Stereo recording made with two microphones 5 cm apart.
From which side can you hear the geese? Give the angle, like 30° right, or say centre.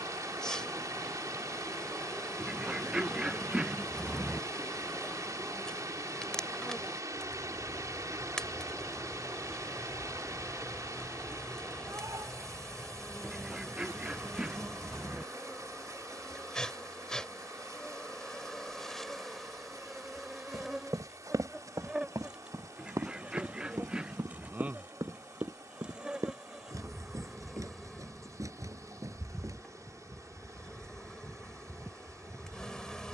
10° right.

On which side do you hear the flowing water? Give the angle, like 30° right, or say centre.
80° right.